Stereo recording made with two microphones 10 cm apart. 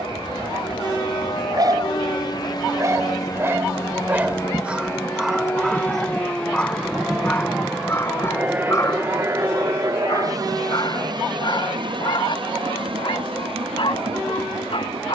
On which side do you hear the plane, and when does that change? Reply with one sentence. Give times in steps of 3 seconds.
You can hear the plane on the left from 0 s, in the centre from 6 s and on the right from 9 s.